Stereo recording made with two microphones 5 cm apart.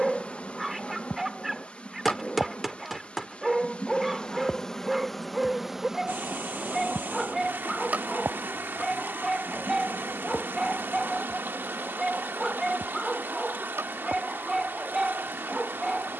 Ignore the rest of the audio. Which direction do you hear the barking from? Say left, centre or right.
centre.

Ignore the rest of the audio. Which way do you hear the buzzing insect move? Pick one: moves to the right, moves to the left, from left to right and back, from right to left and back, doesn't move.
moves to the right.